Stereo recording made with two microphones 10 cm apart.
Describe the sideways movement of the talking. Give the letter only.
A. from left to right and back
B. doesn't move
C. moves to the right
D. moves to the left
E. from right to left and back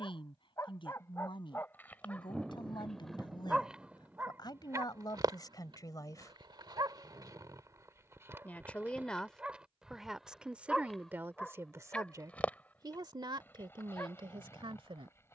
C.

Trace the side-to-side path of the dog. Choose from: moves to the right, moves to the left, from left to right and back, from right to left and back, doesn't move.
from left to right and back.